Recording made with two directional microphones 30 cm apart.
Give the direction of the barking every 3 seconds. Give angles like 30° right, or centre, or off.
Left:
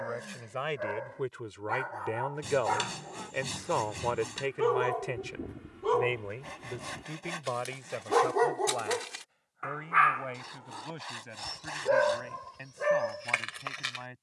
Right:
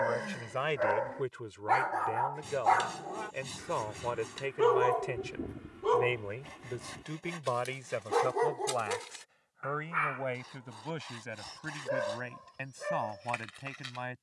50° right, 20° right, 20° left, 50° left, 60° left.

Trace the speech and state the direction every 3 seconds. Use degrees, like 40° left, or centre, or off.
10° left, 20° left, 10° right, 30° right, 40° right.